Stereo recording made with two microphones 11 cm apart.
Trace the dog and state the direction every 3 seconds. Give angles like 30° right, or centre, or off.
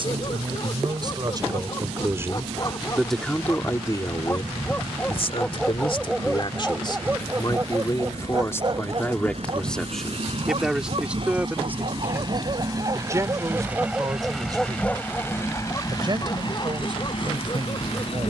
40° left, 20° left, 20° right, 60° right, 30° right, 30° left.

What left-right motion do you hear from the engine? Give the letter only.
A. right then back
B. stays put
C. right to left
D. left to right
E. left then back
C.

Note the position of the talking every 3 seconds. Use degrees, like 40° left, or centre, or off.
40° right, 40° left, 40° left, centre, 30° right, 50° right.